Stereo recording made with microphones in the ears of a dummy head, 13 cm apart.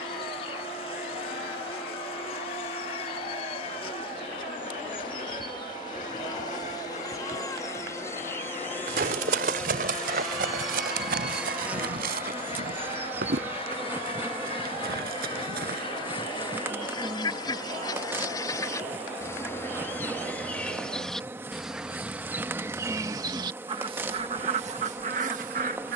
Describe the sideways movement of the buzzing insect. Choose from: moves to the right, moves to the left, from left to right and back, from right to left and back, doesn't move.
moves to the right.